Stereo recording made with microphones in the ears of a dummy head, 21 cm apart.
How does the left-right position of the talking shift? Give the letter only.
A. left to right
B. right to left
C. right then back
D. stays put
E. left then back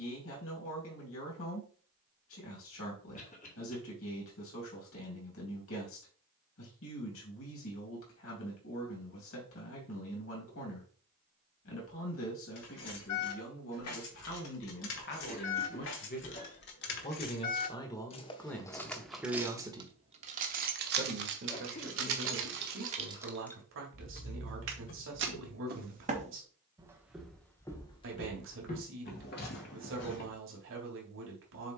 A.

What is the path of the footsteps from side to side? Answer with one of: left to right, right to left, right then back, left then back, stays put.
right to left.